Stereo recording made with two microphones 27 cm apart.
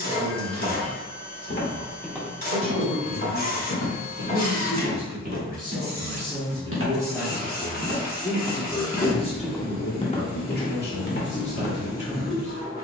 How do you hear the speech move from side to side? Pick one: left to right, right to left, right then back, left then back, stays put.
right to left.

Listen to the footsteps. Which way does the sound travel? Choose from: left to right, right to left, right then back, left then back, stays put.
right then back.